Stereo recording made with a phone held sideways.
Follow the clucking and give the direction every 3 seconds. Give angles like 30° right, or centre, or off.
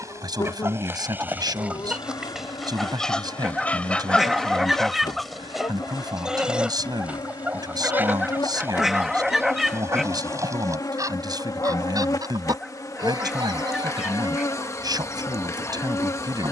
10° right, centre, 10° right, 20° right, 30° right, 30° right.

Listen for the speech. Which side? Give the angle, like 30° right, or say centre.
30° right.